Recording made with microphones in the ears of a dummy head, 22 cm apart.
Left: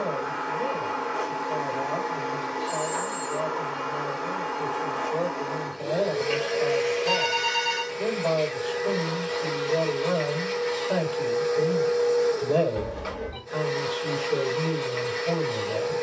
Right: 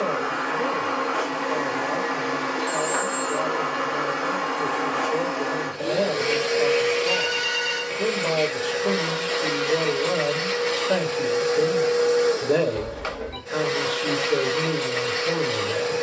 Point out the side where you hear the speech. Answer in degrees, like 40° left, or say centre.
30° right.